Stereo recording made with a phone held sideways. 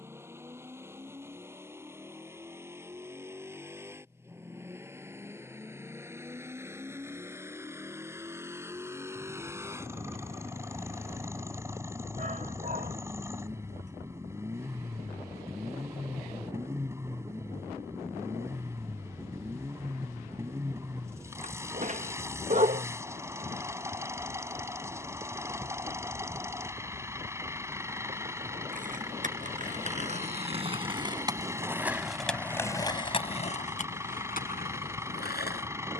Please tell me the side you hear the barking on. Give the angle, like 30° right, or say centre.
50° right.